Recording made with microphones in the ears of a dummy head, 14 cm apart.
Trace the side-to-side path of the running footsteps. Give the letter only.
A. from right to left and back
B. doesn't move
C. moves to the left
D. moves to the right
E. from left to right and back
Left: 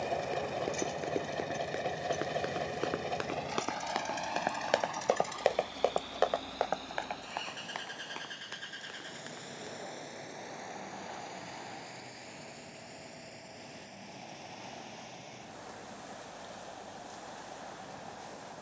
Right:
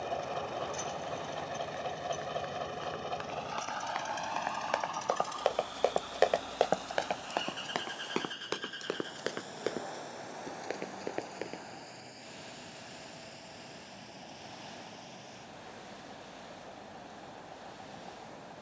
D.